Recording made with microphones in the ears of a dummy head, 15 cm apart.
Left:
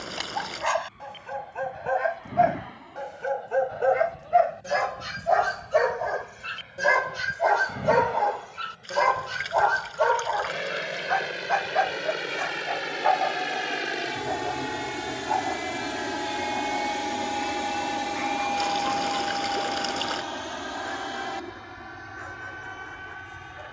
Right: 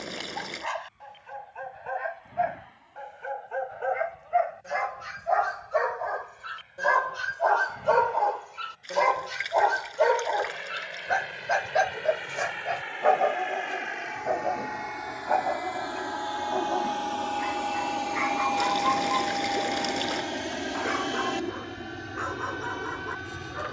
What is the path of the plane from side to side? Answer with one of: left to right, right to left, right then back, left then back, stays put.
left to right.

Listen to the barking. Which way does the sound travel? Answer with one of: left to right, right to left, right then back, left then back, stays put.
left to right.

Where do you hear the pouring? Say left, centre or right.
centre.